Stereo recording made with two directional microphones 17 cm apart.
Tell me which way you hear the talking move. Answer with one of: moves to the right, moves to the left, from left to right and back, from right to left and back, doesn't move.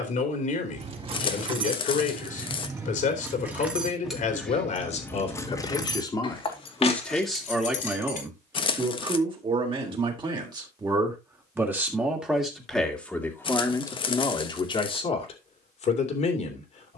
from left to right and back.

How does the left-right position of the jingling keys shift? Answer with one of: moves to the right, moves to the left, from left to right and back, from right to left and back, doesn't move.
moves to the left.